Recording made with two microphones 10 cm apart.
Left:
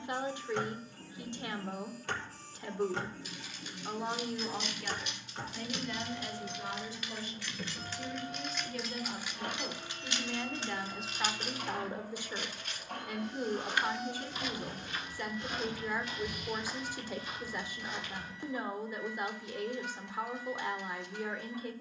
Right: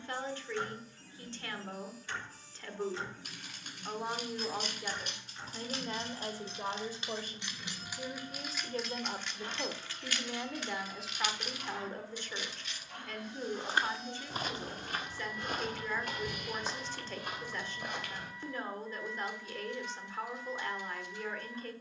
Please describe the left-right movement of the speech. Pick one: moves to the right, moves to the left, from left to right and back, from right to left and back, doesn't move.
from left to right and back.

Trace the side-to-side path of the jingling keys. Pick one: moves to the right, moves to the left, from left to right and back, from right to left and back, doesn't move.
moves to the left.